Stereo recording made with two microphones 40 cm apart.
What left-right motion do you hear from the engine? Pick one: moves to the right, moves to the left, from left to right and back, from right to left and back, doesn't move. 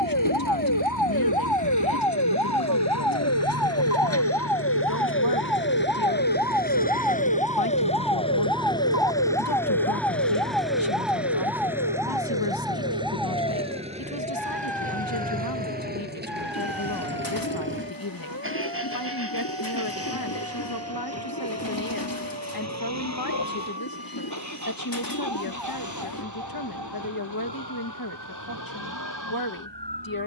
moves to the right.